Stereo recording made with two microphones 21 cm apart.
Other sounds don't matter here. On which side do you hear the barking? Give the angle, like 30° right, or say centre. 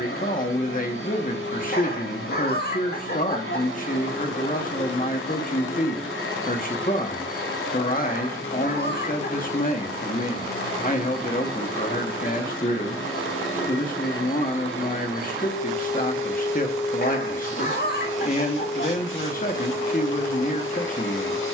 50° left.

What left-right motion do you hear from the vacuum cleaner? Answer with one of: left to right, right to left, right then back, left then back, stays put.
stays put.